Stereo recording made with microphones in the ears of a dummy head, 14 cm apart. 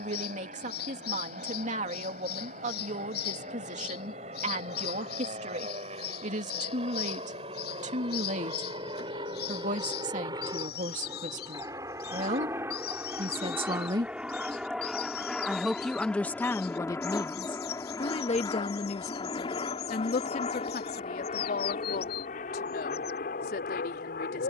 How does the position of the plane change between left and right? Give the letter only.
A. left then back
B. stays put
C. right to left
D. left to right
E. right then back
C.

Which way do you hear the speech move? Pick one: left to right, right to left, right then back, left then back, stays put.
right to left.